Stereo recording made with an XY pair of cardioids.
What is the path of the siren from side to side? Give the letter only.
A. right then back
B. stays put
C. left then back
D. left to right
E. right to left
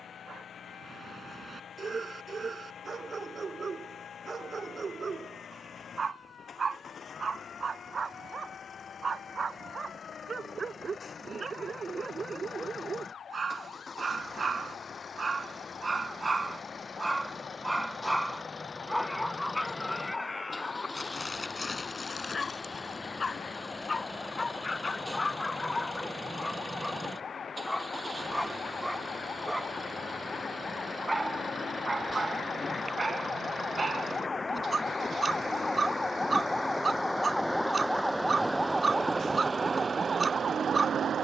D.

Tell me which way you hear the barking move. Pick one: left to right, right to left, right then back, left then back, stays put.
left then back.